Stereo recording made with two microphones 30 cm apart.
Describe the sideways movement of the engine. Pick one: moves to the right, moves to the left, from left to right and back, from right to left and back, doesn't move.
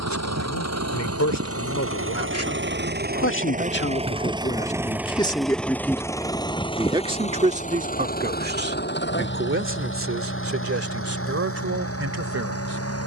moves to the left.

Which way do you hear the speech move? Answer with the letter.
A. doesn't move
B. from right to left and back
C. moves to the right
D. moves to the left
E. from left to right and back
C.